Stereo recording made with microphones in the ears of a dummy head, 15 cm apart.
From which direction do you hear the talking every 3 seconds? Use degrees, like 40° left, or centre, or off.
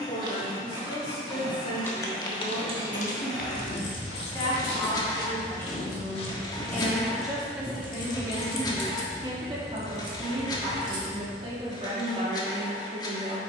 30° left, 20° left, 10° right, 30° right, 30° right.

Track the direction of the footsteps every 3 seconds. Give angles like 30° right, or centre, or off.
10° left, 60° left, 10° left, off, off.